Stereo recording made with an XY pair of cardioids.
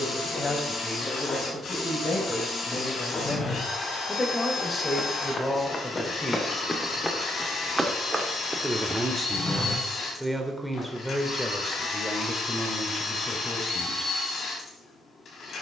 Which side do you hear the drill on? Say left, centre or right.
left.